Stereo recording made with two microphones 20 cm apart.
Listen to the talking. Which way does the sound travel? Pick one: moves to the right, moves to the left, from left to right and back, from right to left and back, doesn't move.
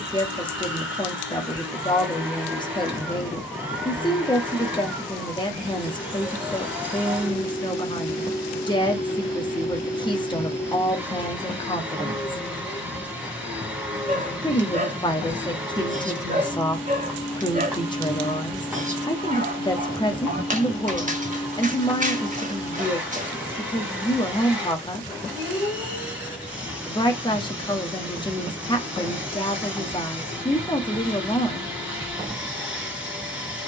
doesn't move.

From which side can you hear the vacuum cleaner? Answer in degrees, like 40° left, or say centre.
10° right.